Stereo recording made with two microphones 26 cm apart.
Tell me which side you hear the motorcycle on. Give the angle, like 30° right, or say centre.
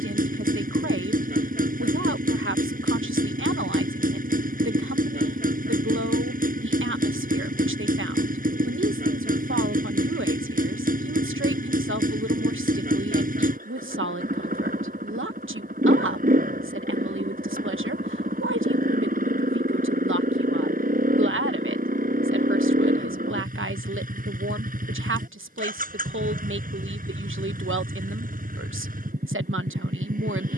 30° right.